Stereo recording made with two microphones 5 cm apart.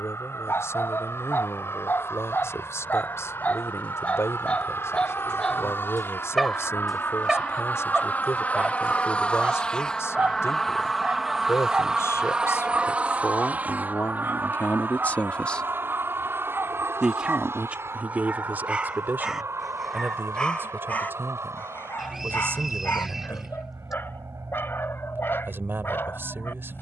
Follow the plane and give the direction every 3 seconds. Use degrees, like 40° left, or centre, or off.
70° left, 60° left, 40° left, 10° left, 30° right, 50° right, 60° right, 70° right, 70° right.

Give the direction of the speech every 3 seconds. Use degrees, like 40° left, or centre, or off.
80° left, 80° left, 80° left, 80° left, 60° left, centre, 50° right, 50° right, 50° right.